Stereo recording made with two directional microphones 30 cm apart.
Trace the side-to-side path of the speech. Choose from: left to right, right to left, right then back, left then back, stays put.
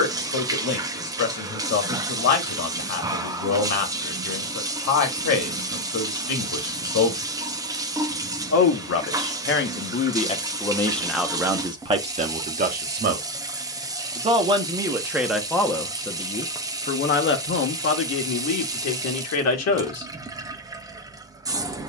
right then back.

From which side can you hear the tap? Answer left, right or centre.
centre.